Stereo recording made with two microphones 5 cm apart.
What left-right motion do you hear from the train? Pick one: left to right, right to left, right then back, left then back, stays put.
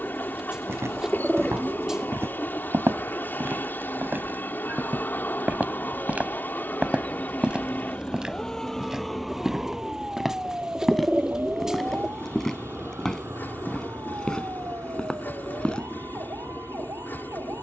stays put.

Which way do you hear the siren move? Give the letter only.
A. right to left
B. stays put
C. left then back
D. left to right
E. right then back
D.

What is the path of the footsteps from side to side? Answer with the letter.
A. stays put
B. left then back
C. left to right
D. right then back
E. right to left
E.